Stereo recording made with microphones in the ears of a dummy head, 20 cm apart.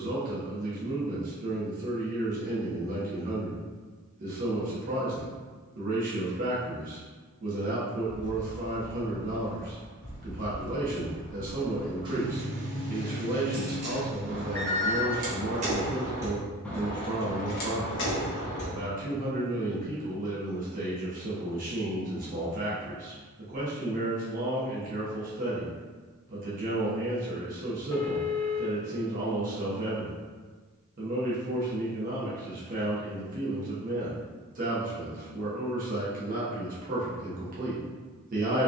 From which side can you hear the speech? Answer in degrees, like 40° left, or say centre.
40° right.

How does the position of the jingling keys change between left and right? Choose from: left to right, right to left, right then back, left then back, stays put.
right then back.